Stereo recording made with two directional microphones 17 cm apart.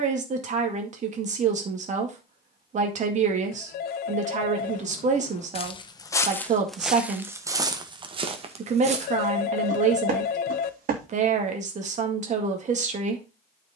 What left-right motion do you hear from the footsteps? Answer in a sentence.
You can hear the footsteps move to the right.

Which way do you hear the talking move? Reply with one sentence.
You can hear the talking stay in one place.